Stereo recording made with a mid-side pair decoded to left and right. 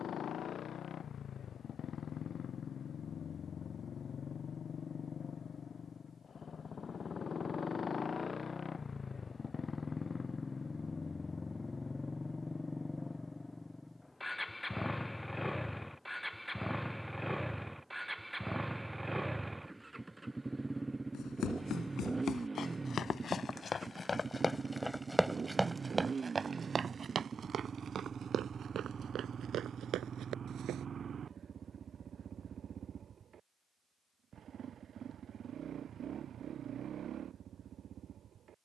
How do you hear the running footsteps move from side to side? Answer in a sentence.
You can hear the running footsteps move to the right.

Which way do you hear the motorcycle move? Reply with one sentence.
In this clip you hear the motorcycle move from left to right.